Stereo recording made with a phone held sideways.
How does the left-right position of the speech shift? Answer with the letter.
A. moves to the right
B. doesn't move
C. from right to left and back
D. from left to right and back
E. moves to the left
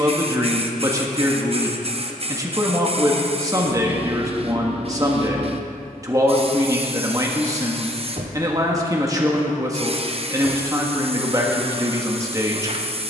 B.